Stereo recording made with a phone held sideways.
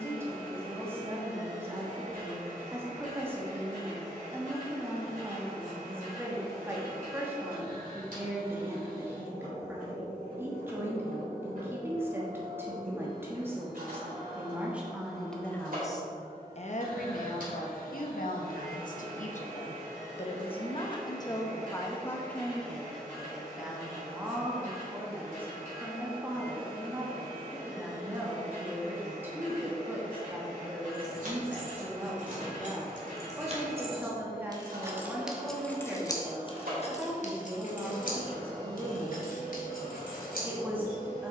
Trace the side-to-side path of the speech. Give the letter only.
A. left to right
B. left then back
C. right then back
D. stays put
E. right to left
B.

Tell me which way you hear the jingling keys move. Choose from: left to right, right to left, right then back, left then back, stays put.
right to left.